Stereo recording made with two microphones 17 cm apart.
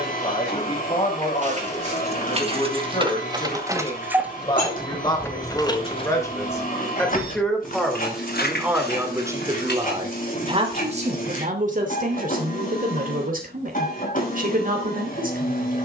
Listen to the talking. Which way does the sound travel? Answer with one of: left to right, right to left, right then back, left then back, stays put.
left to right.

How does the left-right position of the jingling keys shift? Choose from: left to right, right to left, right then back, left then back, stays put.
right to left.